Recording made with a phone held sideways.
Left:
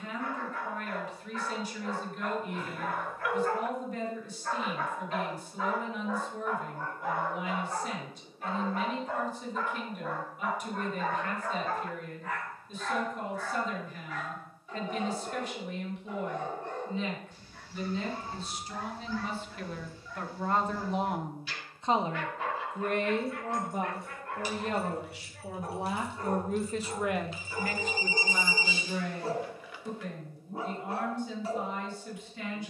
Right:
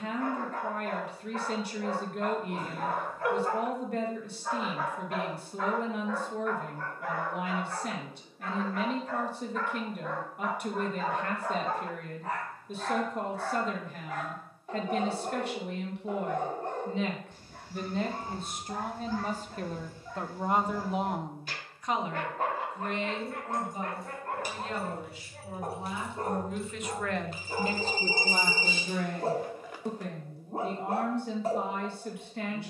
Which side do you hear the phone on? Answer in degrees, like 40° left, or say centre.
40° right.